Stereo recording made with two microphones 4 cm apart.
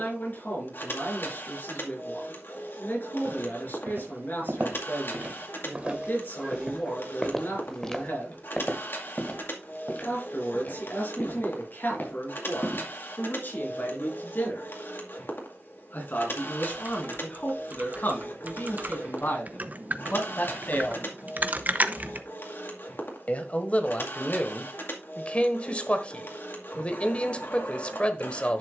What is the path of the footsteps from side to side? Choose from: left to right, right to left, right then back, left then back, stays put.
right to left.